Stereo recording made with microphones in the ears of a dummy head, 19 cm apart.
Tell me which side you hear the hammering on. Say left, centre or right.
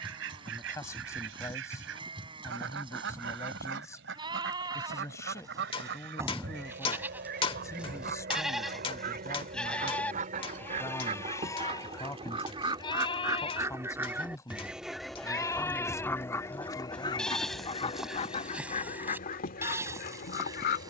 left.